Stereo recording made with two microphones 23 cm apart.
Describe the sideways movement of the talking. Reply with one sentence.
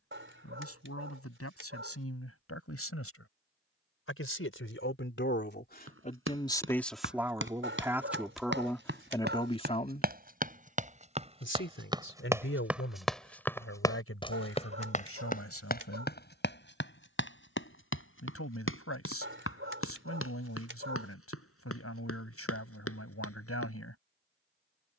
You can hear the talking go right and come back.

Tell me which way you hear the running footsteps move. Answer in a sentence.
In this clip you hear the running footsteps go from the right side to the left.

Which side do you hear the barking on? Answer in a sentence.
In this clip you hear the barking on the right.